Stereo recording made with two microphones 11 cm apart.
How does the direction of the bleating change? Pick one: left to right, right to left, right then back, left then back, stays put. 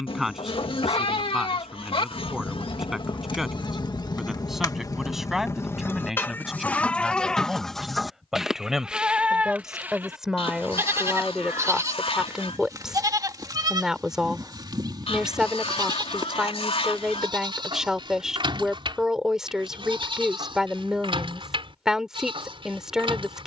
left to right.